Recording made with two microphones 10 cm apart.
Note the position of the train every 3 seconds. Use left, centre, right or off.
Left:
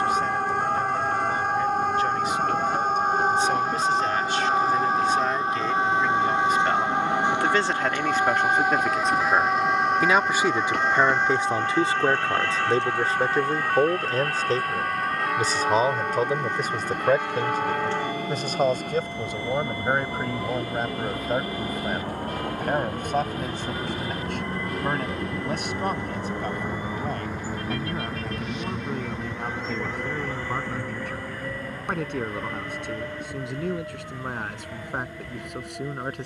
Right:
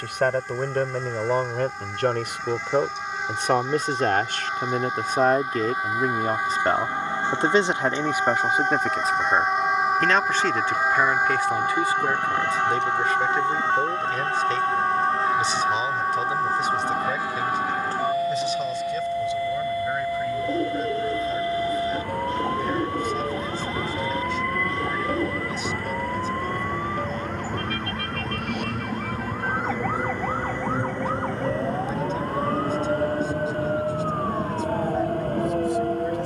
left, left, left, left, left, left, left, left, left, centre, right, right.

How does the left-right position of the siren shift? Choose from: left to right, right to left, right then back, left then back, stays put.
left to right.